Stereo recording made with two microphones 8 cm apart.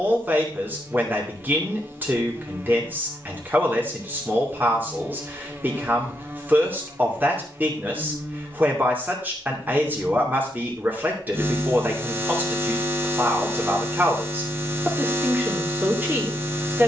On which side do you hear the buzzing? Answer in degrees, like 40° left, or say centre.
20° right.